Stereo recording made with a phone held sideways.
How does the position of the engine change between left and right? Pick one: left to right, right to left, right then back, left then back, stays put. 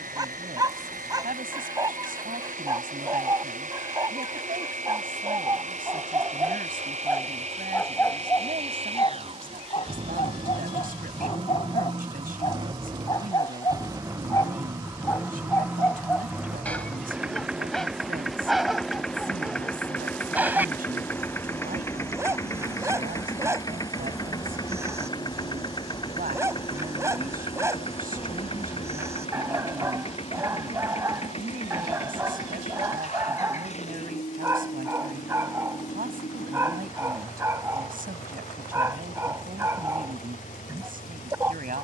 right to left.